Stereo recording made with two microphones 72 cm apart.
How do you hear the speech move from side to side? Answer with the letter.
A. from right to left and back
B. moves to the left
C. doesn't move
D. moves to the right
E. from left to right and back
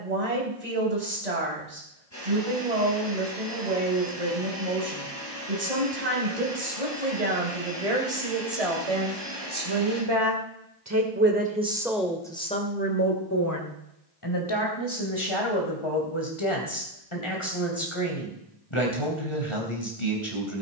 B.